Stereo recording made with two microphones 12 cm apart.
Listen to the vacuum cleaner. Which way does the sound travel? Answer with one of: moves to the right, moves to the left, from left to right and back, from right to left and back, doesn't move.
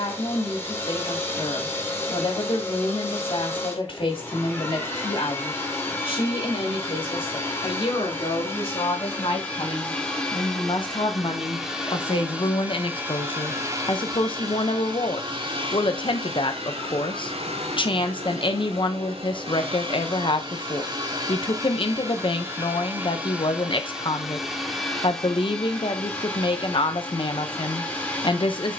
from left to right and back.